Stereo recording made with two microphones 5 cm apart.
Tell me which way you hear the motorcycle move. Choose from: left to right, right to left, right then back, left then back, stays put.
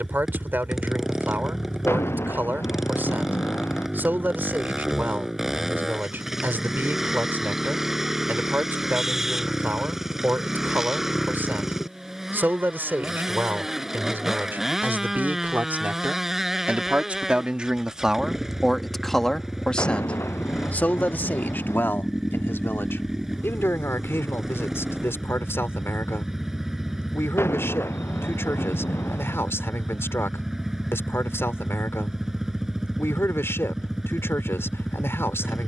stays put.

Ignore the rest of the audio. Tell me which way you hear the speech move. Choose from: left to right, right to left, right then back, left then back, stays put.
right to left.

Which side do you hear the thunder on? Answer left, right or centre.
left.